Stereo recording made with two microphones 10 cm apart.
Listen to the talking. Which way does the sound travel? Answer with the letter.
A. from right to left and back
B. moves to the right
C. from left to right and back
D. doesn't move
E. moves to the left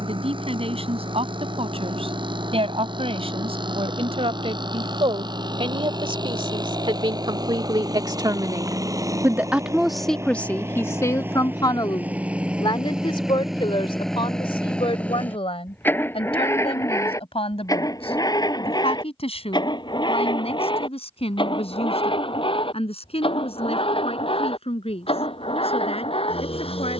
E.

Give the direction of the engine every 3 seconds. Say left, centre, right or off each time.
right, right, right, right, centre, left, left, left, left.